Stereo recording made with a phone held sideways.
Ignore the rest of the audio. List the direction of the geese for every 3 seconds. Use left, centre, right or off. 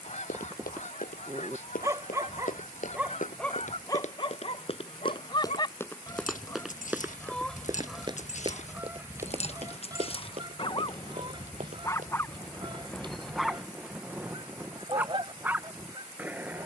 left, left, centre, right, right, right.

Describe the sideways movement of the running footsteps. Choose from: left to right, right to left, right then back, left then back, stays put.
left to right.